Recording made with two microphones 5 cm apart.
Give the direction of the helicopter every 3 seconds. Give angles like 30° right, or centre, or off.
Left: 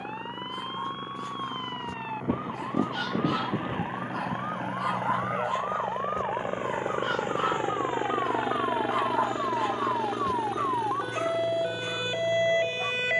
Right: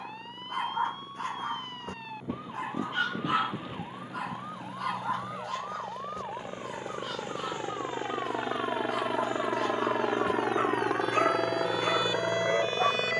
60° left, 50° left, 20° left, 30° right, 60° right.